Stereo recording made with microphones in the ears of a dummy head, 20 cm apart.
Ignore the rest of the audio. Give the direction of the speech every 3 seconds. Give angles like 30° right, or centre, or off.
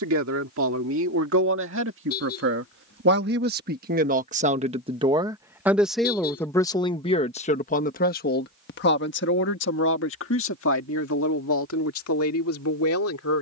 60° right, 30° right, 30° left, 60° left, 70° left.